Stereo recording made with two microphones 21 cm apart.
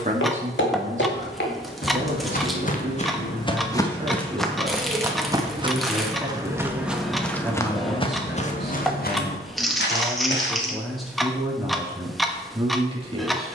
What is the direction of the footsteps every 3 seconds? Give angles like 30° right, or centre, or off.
50° left, centre, 10° left, 60° left, off.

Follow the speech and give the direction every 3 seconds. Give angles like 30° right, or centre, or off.
30° right, 20° right, centre, centre, 20° right.